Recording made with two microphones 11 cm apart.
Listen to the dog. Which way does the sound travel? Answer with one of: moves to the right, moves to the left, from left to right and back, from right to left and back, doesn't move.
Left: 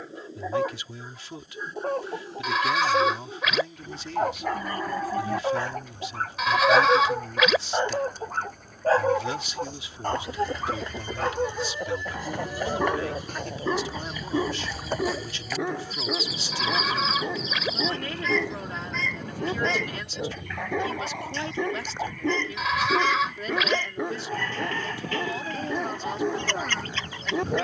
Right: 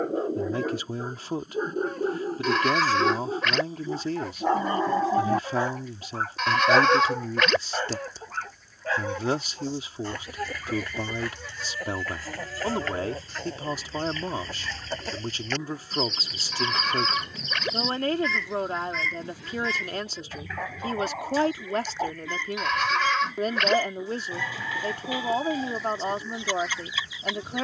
moves to the left.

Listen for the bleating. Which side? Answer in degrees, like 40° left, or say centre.
centre.